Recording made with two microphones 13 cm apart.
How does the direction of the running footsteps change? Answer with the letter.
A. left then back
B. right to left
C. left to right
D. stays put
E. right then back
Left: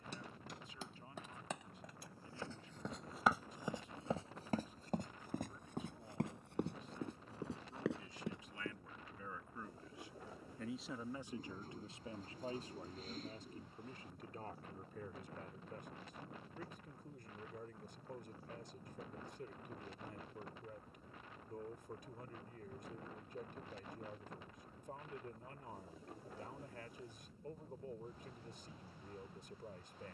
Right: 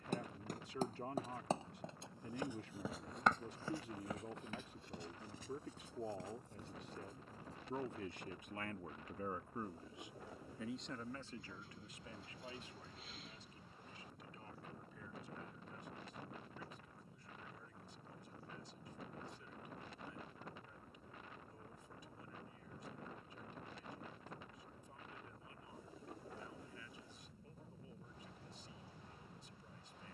B.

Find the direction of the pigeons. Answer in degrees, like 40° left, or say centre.
40° left.